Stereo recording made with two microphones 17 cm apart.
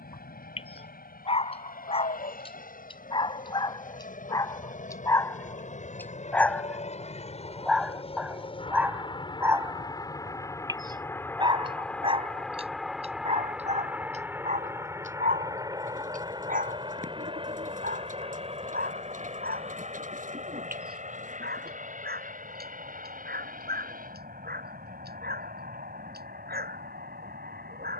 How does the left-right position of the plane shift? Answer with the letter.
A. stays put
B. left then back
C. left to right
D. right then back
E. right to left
C.